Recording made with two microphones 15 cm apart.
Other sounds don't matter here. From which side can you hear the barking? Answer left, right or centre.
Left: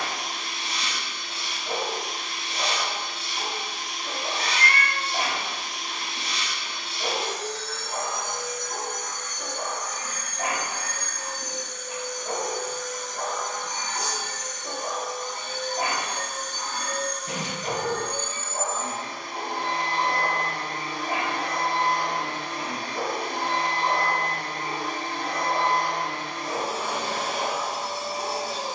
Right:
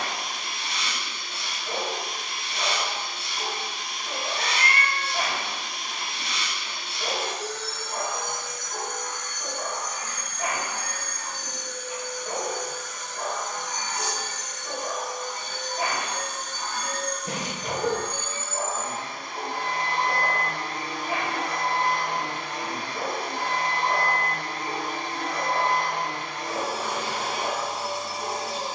left.